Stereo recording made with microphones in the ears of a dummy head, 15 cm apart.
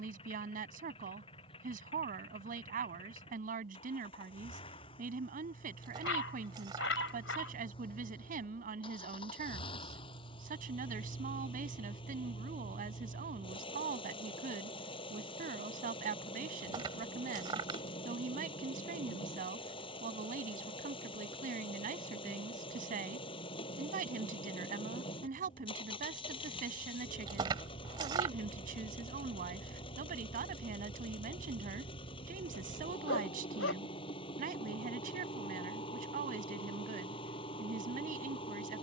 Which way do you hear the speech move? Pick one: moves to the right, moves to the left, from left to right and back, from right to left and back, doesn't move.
doesn't move.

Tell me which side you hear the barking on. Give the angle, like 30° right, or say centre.
90° left.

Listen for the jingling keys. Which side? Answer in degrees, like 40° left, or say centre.
30° right.